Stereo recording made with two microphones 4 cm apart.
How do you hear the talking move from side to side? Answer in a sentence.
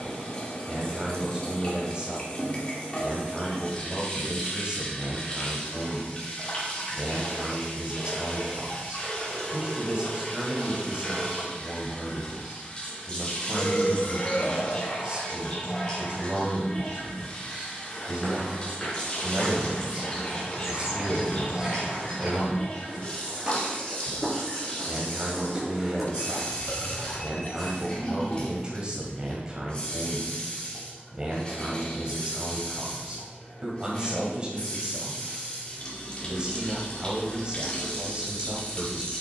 In this clip you hear the talking stay in one place.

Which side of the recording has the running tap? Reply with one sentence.
In this clip you hear the running tap on the left.